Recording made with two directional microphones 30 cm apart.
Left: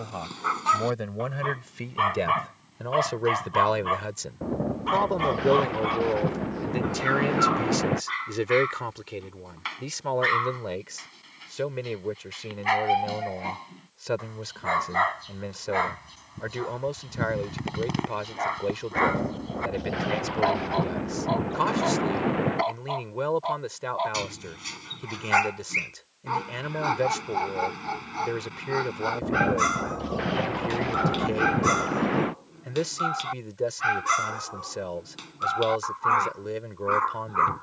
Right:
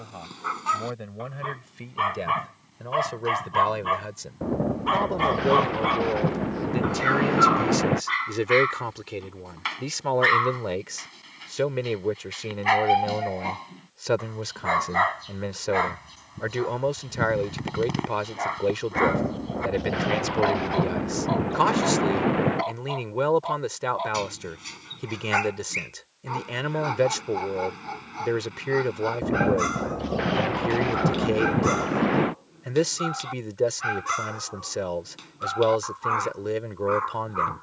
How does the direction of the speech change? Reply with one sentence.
In this clip you hear the speech move from left to right.